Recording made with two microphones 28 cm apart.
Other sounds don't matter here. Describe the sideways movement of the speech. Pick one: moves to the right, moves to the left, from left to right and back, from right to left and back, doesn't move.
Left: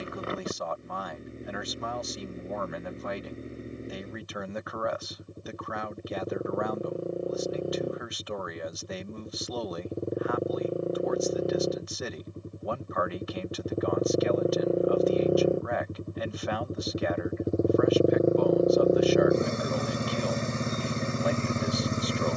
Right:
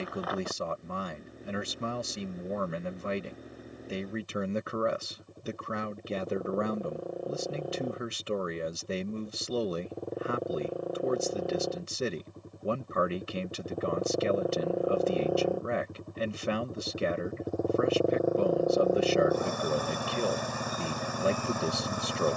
doesn't move.